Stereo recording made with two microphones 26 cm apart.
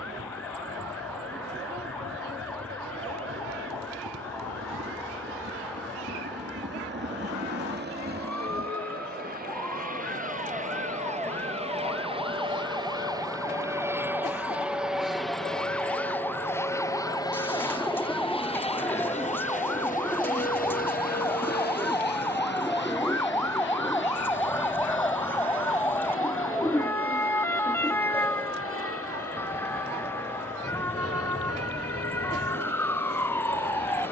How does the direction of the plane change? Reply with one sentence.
You can hear the plane move from right to left.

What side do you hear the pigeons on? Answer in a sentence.
In this clip you hear the pigeons in the centre.